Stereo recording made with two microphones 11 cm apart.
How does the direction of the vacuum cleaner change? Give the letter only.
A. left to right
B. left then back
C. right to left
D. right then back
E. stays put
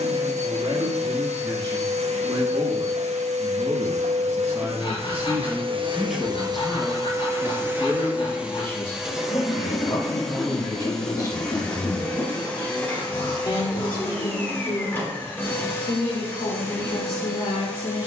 C.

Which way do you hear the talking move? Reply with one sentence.
In this clip you hear the talking move from right to left.